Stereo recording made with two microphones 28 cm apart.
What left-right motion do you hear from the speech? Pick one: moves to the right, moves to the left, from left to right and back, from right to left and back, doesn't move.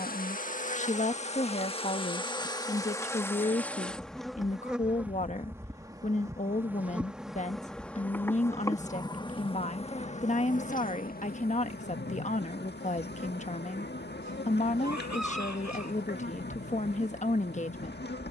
doesn't move.